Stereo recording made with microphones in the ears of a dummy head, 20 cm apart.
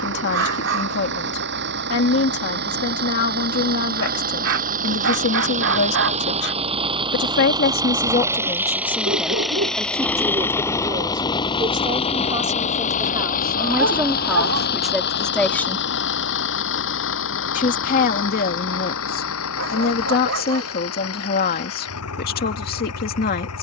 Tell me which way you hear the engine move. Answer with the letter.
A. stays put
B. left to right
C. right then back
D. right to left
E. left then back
D.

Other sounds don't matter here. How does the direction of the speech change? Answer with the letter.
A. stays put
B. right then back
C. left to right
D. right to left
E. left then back
B.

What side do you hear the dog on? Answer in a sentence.
In this clip you hear the dog on the right.